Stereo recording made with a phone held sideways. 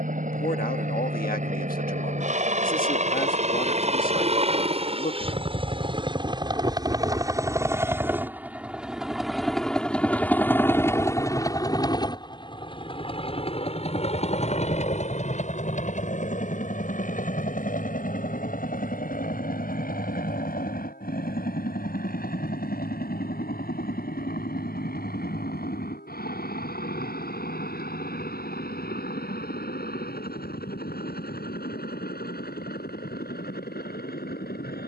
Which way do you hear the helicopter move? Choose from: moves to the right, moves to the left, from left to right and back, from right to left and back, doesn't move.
moves to the left.